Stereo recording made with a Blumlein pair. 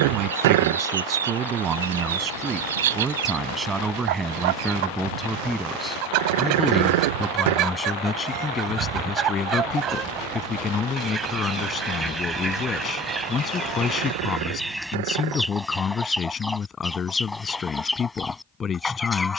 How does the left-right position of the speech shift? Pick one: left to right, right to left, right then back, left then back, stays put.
right to left.